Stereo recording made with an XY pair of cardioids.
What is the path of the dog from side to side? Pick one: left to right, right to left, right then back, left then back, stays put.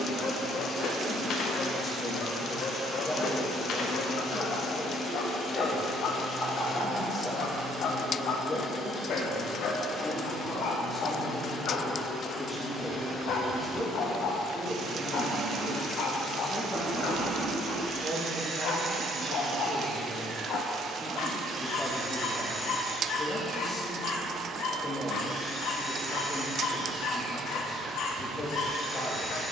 stays put.